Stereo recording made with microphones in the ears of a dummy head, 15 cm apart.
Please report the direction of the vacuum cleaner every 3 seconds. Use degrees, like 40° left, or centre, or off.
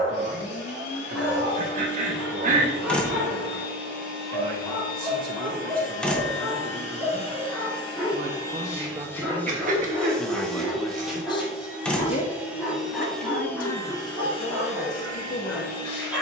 70° left, 60° left, 30° left, centre, 10° left, 60° left.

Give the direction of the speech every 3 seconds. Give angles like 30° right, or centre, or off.
50° right, 50° right, 40° right, centre, 50° left, 50° left.